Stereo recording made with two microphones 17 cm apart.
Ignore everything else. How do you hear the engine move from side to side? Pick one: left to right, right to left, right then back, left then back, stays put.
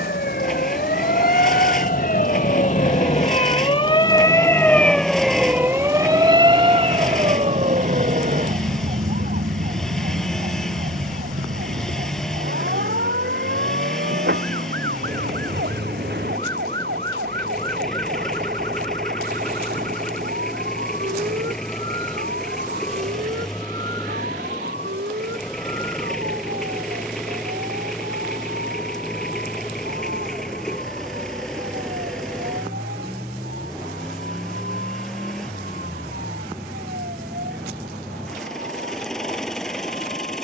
stays put.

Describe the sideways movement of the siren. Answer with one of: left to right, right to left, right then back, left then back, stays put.
left to right.